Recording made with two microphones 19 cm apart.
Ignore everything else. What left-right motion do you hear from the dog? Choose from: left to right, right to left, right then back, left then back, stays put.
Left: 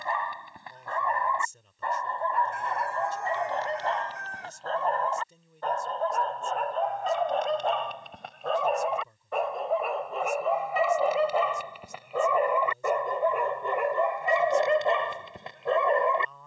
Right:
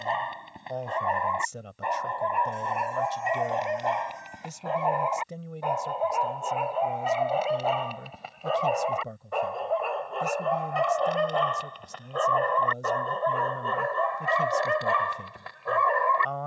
right to left.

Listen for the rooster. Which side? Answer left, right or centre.
left.